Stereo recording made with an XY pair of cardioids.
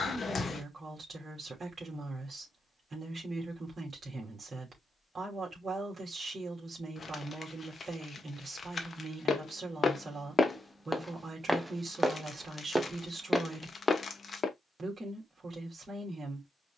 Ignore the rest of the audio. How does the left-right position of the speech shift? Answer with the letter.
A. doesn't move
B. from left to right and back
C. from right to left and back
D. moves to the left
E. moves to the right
A.